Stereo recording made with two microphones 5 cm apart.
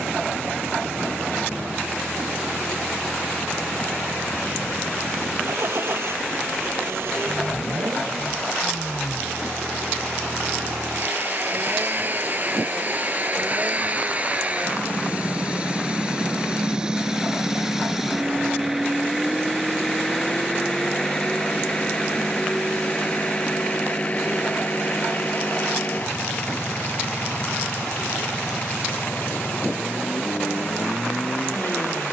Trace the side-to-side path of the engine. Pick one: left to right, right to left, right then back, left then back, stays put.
right to left.